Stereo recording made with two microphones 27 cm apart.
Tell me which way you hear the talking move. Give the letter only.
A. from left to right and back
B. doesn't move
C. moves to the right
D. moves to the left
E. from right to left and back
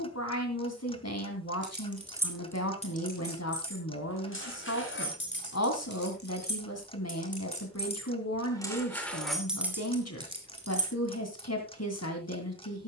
B.